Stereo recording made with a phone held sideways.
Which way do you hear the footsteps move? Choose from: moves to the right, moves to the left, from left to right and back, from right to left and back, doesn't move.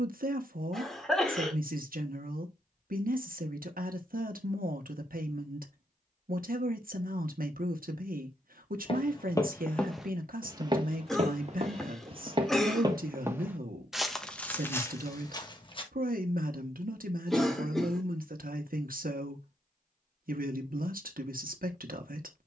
from left to right and back.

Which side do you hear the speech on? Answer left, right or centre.
right.